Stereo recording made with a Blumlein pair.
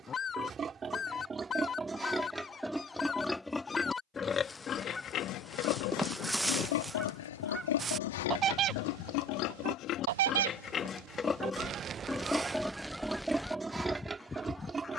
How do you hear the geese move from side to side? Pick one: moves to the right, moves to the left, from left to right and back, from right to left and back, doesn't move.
from left to right and back.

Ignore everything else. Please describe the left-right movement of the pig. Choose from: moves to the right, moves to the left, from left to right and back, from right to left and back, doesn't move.
from right to left and back.